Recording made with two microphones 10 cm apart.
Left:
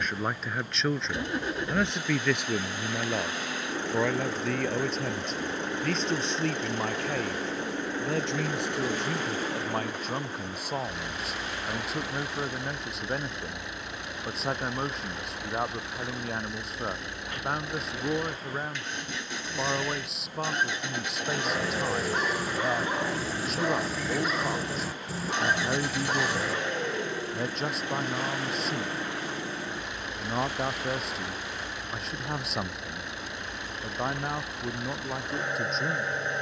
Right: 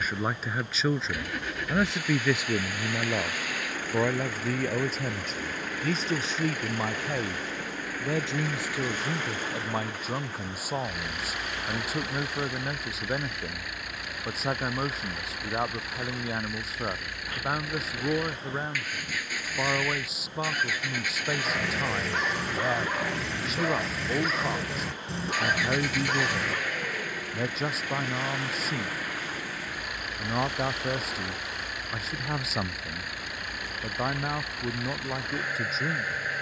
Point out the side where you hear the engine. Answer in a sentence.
In this clip you hear the engine on the left.